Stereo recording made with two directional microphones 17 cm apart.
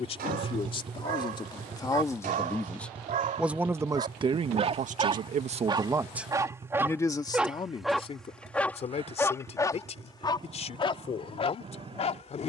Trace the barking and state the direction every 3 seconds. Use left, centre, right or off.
right, right, centre, left.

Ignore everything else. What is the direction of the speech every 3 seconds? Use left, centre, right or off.
left, right, left, left.